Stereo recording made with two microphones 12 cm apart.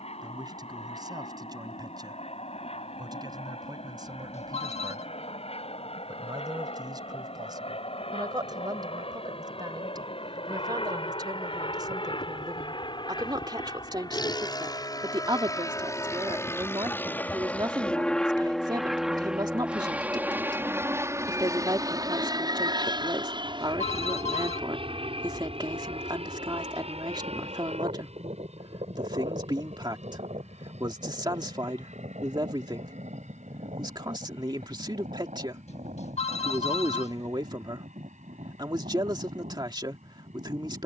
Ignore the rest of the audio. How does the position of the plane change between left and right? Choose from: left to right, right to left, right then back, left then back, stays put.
left to right.